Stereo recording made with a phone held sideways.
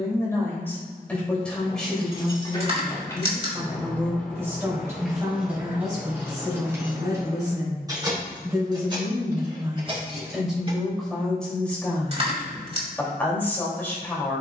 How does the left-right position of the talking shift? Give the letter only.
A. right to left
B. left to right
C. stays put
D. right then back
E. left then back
D.